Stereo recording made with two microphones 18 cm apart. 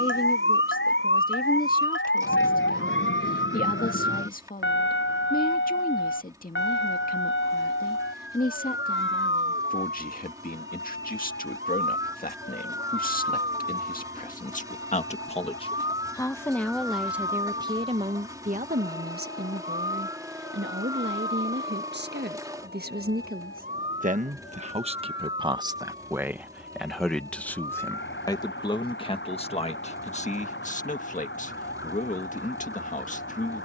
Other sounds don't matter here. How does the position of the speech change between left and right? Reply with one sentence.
You can hear the speech go right and come back.